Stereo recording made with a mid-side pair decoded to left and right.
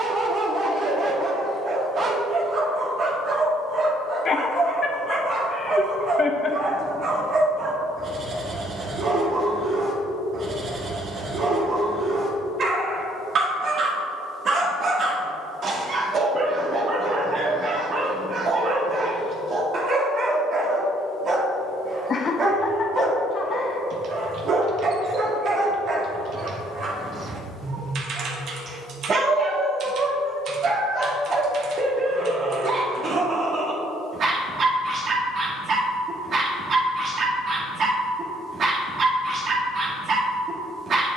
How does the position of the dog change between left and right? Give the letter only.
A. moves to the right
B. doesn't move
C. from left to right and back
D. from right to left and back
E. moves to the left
B.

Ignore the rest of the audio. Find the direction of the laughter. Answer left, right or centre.
left.